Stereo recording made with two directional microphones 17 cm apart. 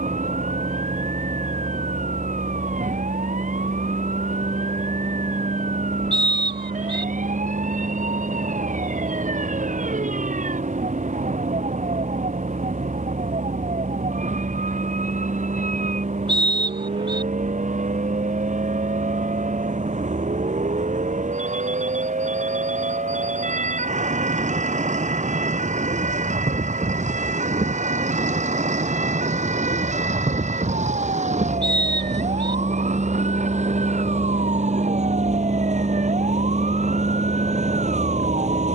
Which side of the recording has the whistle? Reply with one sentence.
In this clip you hear the whistle on the right.